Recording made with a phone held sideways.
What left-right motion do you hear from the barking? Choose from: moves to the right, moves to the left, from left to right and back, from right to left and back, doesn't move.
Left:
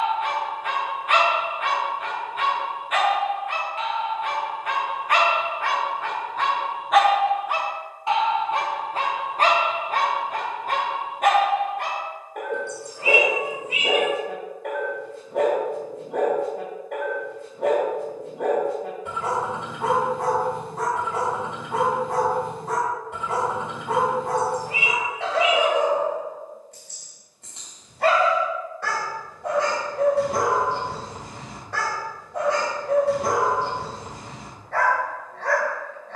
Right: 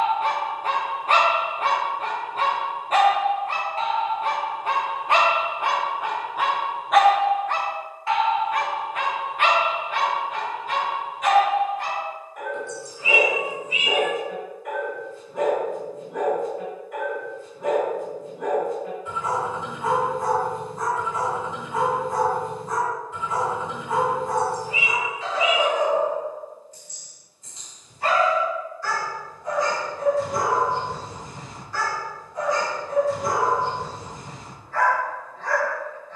moves to the left.